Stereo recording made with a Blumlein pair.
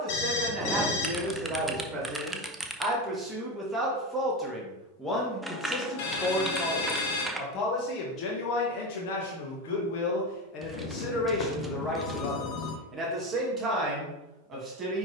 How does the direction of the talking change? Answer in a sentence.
You can hear the talking go left and come back.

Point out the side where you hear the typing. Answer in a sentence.
You can hear the typing in the centre.